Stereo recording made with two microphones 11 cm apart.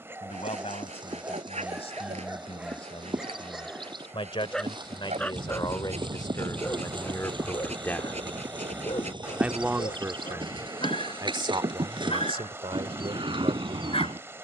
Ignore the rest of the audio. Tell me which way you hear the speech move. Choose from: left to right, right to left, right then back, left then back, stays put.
left to right.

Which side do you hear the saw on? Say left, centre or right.
right.